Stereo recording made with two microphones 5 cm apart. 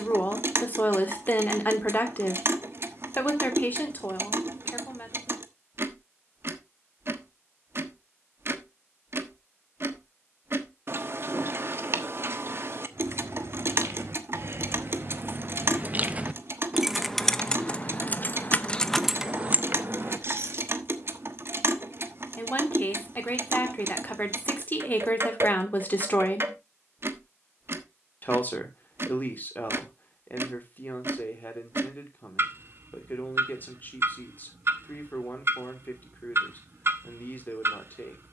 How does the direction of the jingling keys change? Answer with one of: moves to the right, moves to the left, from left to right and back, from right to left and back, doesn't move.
from right to left and back.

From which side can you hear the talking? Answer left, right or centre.
left.